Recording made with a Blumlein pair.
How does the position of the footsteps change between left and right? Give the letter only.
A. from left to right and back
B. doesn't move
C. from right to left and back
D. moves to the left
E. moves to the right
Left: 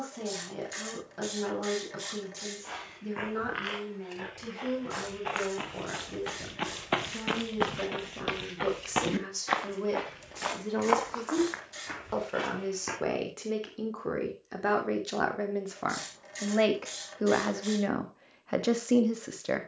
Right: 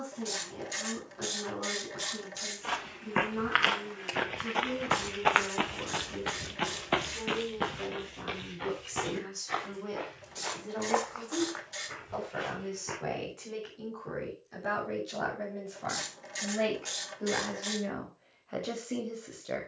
D.